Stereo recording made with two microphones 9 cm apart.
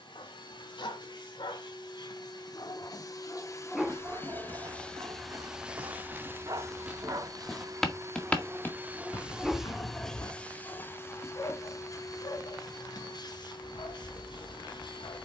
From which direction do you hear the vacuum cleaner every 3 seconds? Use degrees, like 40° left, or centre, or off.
60° left, 20° left, 30° right, 10° left, 50° left.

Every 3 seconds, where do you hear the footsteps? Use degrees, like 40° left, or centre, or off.
off, 40° right, 10° right, 40° left, off.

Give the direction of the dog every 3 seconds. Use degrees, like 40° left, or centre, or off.
60° left, 20° right, 40° right, 20° left, 60° left.